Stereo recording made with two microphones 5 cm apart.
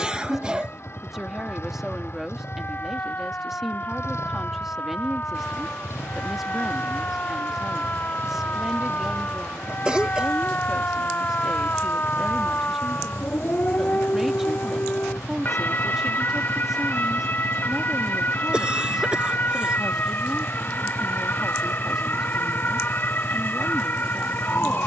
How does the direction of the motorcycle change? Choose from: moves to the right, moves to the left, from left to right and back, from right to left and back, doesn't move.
doesn't move.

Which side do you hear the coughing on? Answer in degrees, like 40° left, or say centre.
20° right.